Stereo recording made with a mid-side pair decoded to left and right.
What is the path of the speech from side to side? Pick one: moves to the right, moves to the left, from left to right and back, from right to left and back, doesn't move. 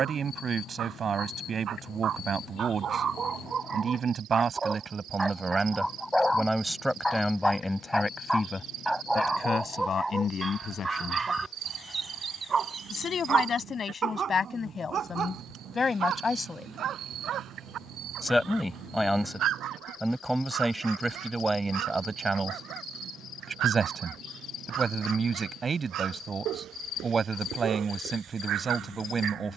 from right to left and back.